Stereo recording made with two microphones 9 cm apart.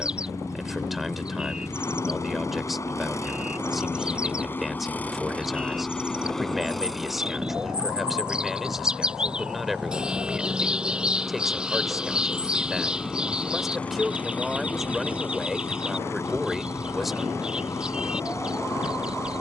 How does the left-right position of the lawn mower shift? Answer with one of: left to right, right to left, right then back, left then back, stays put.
right then back.